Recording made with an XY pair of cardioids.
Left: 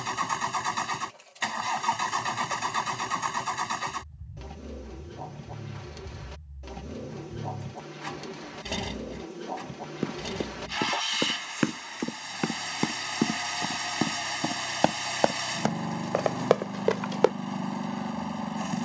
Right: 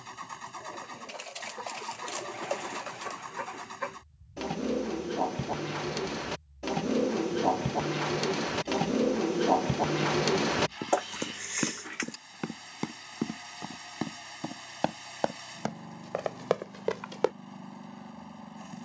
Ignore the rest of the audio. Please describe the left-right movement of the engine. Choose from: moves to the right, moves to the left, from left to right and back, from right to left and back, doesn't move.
doesn't move.